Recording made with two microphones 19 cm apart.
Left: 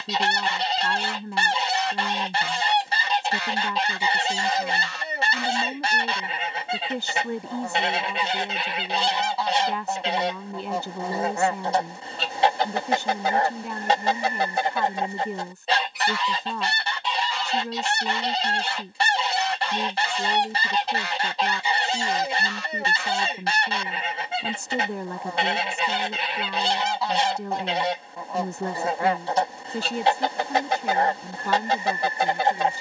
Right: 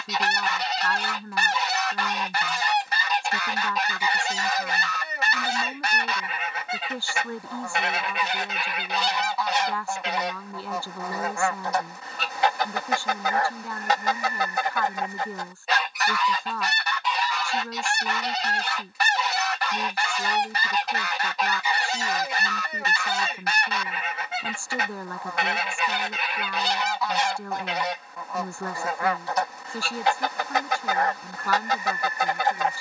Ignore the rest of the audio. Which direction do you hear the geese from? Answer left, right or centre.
left.